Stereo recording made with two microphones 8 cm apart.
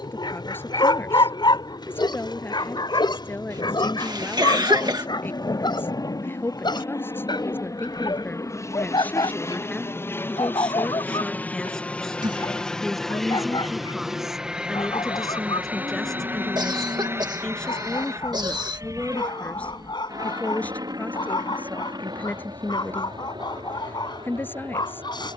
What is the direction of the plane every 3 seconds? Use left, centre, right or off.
left, left, left, left, centre, right, right, right, right.